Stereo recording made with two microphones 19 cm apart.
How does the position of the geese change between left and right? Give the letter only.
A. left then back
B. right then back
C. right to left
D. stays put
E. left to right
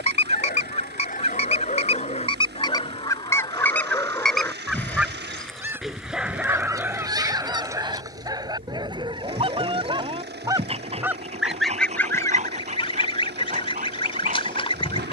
B.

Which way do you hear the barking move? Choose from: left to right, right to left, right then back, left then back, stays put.
left to right.